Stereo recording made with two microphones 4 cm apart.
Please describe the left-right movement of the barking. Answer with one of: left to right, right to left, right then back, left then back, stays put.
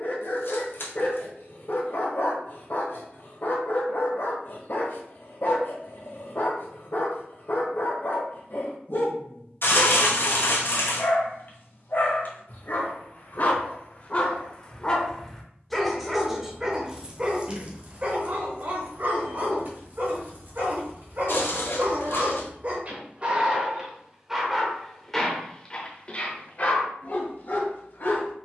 right then back.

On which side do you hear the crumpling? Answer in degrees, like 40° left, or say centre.
60° left.